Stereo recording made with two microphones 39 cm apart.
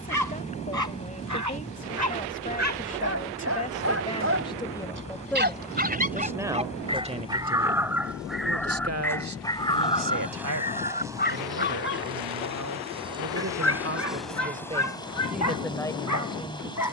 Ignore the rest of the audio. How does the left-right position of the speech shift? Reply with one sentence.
You can hear the speech go right and come back.